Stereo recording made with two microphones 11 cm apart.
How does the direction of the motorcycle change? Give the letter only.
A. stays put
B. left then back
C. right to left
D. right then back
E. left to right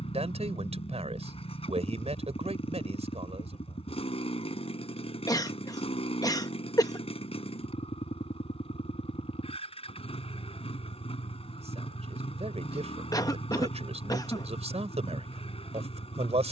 A.